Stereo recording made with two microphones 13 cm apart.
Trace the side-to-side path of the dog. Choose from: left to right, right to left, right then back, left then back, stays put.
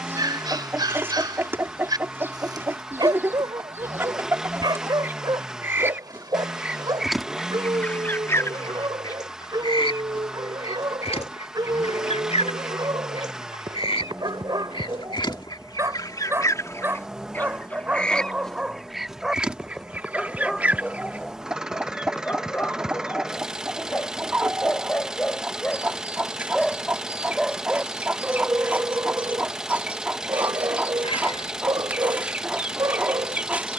left then back.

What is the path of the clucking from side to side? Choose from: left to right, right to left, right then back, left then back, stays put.
left then back.